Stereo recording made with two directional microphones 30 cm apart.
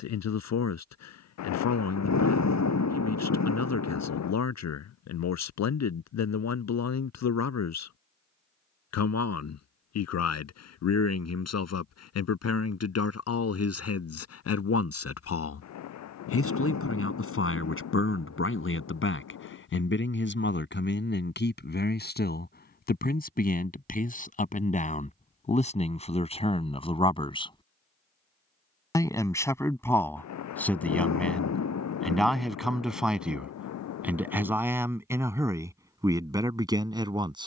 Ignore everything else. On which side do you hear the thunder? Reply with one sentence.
In this clip you hear the thunder on the left.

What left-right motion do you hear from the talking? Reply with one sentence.
You can hear the talking go from the left side to the right.